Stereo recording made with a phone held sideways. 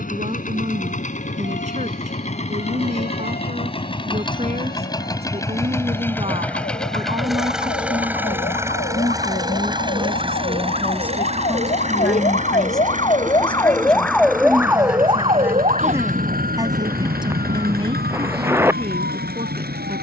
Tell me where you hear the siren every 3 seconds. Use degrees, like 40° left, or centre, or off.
80° left, 80° left, 70° left, 60° left, 20° left, 50° right, 70° right.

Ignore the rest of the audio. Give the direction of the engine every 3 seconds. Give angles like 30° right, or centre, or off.
50° left, 30° left, centre, 30° right, 50° right, 60° right, 70° right.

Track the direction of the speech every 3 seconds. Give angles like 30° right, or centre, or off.
50° right, 40° right, 30° right, 20° right, centre, 20° right, 40° right.